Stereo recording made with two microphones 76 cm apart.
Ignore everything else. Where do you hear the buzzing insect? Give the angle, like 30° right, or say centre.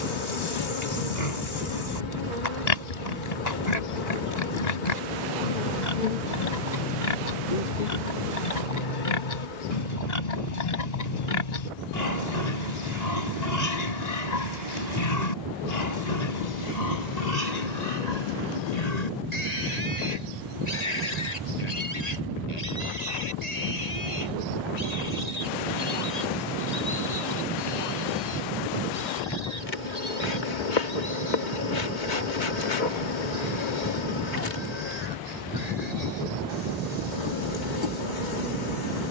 80° left.